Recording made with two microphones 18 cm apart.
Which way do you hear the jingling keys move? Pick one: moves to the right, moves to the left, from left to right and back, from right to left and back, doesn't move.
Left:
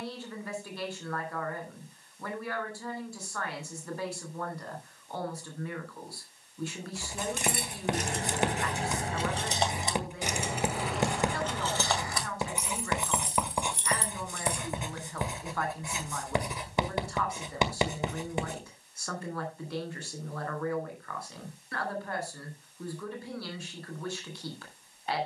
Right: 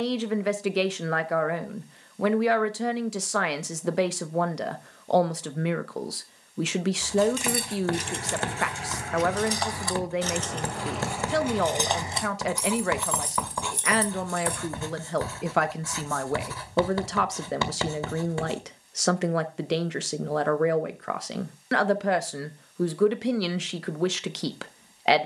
moves to the right.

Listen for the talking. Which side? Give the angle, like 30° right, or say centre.
80° right.